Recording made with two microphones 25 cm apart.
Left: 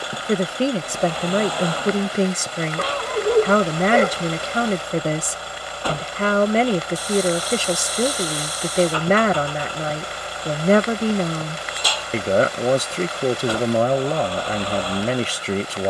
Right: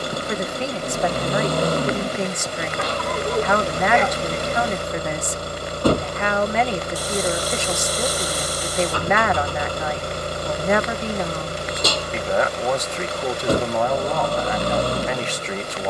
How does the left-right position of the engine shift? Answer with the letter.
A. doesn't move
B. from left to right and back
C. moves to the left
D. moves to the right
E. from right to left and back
A.